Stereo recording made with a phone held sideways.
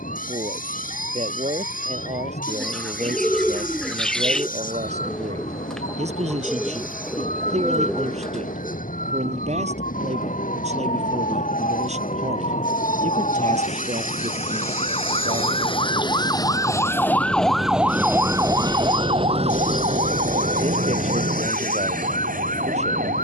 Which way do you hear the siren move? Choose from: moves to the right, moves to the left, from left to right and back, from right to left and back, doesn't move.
moves to the right.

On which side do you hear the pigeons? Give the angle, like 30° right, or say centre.
centre.